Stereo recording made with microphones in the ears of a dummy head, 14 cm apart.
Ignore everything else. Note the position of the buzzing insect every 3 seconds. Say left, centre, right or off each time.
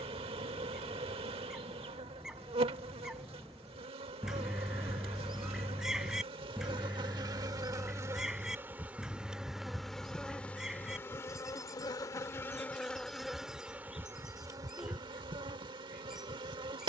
right, right, right, centre, centre, right.